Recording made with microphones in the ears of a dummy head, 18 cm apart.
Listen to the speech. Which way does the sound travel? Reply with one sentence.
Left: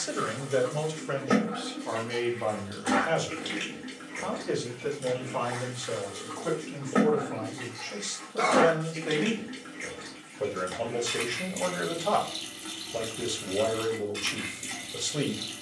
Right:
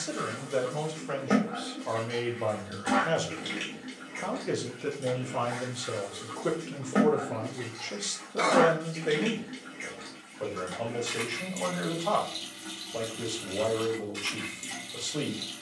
In this clip you hear the speech move from left to right and back again.